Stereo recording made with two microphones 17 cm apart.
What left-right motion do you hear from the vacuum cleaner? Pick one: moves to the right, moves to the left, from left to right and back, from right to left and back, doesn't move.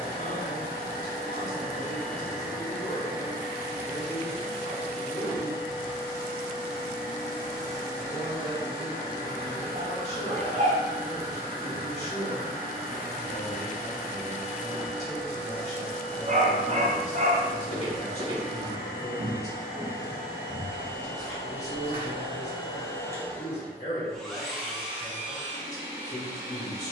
moves to the right.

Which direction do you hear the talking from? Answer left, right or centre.
left.